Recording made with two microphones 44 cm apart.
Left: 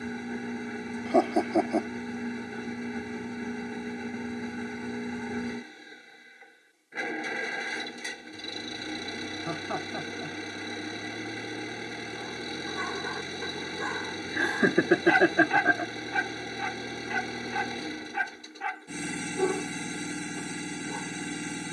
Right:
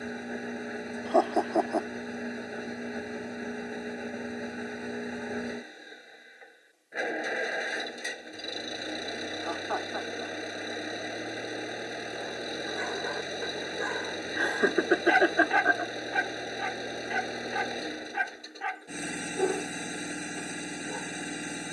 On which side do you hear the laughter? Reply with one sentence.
In this clip you hear the laughter on the left.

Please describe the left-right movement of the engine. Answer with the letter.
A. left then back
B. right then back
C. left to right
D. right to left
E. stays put
E.